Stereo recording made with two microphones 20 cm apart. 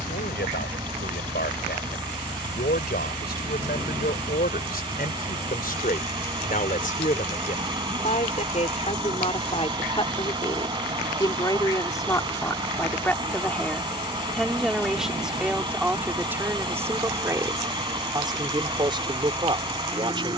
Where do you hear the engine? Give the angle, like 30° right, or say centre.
30° right.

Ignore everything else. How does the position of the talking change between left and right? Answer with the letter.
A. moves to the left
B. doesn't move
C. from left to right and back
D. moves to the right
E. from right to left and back
D.